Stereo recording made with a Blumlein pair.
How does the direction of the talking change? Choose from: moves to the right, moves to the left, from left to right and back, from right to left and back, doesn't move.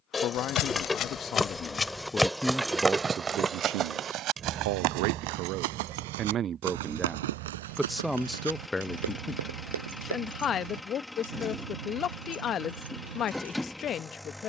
from left to right and back.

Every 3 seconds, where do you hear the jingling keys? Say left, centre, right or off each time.
centre, right, right, right, right.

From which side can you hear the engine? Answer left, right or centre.
centre.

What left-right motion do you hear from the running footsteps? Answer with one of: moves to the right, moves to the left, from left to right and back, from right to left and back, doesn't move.
moves to the right.